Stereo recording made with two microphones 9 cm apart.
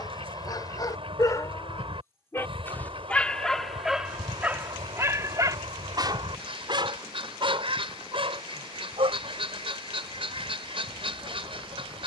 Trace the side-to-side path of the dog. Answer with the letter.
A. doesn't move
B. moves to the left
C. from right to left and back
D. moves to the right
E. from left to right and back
D.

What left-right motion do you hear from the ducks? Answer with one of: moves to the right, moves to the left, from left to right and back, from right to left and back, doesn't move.
doesn't move.